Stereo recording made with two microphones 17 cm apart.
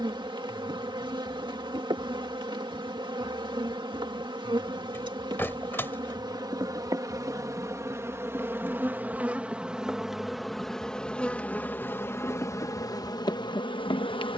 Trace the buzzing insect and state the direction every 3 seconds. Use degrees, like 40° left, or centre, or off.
30° right, 30° right, 20° right, centre, 20° left.